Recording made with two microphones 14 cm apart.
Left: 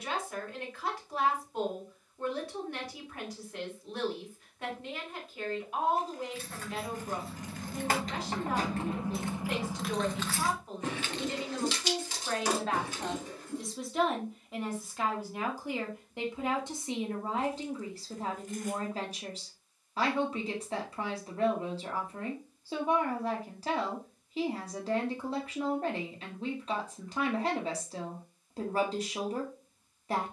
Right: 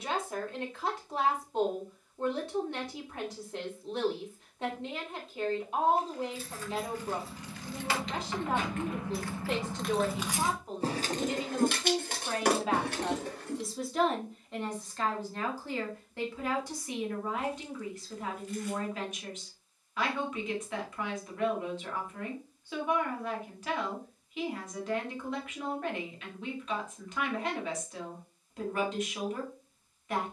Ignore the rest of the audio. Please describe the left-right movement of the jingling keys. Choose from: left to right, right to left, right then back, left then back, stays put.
left to right.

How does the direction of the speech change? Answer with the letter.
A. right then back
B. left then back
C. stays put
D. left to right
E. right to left
E.